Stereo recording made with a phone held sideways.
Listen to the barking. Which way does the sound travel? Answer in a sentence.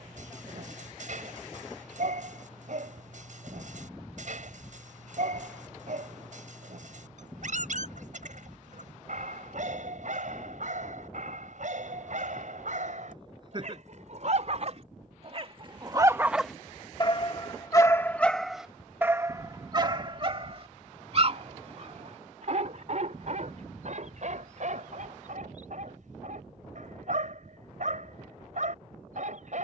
You can hear the barking move from right to left and back again.